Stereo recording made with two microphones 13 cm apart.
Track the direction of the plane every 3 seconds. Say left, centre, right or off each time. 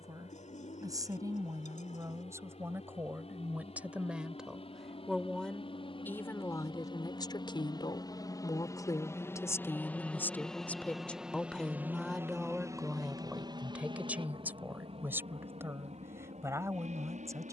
left, left, left, centre, right, right.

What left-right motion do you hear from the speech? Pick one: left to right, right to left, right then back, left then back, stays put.
left then back.